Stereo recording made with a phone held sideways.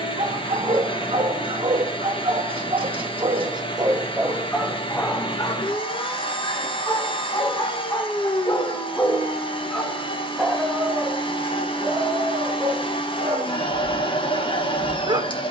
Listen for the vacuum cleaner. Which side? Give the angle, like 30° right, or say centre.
40° left.